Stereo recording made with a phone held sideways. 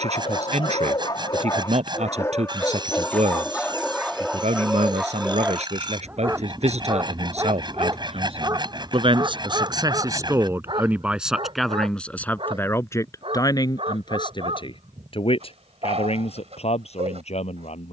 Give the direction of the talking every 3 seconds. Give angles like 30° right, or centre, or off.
60° right, 60° right, 50° right, 20° right, 30° left, 50° left.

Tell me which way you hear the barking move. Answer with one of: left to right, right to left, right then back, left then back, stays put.
left to right.